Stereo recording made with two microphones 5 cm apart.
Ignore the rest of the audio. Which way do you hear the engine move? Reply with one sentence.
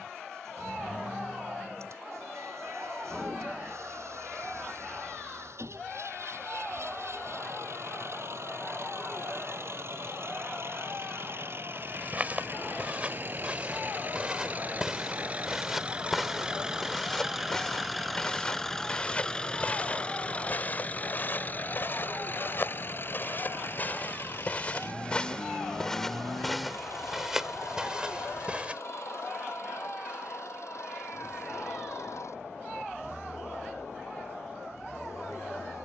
You can hear the engine travel towards the left.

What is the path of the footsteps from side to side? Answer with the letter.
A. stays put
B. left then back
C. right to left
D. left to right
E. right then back
B.